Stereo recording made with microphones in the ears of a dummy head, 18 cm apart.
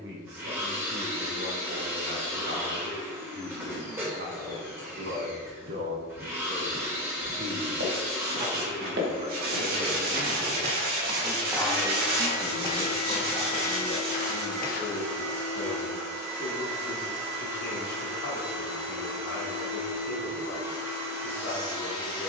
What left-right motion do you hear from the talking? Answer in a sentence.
You can hear the talking move from right to left.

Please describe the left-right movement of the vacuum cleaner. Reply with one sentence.
In this clip you hear the vacuum cleaner stay in one place.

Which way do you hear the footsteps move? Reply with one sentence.
You can hear the footsteps travel towards the left.